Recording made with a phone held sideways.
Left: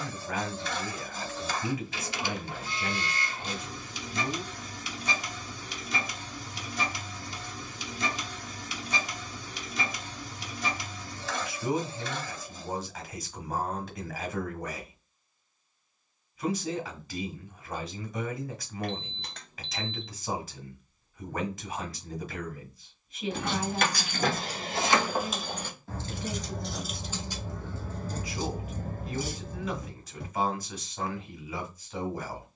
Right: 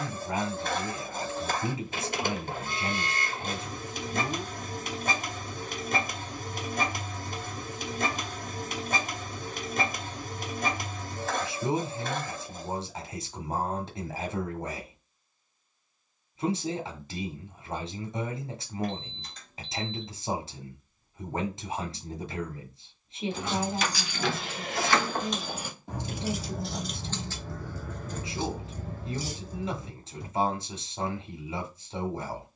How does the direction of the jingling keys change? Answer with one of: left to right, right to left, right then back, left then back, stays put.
right then back.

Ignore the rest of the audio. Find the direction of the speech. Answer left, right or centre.
right.